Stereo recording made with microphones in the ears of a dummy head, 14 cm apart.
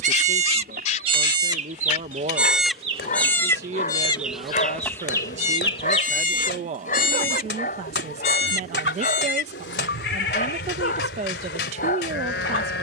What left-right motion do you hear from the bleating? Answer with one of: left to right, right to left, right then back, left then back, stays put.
right to left.